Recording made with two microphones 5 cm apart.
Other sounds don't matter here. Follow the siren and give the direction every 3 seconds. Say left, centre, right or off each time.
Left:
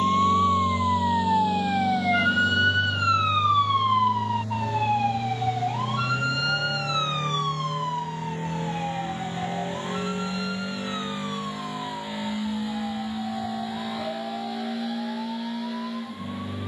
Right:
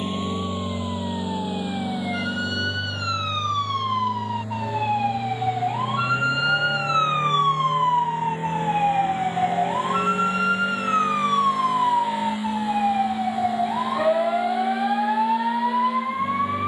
left, centre, right, right, right, right.